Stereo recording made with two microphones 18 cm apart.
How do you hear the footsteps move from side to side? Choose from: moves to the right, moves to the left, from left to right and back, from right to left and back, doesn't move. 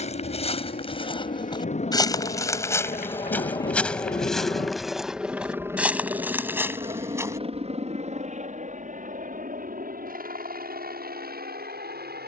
moves to the right.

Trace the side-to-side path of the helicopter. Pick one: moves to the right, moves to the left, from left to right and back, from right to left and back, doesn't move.
moves to the right.